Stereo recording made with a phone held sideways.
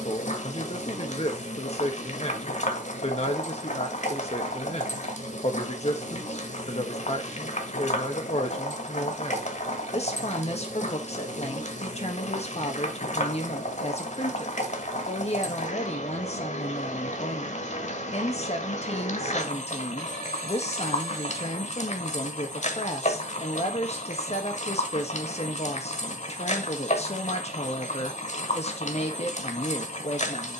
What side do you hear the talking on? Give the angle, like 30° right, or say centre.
40° left.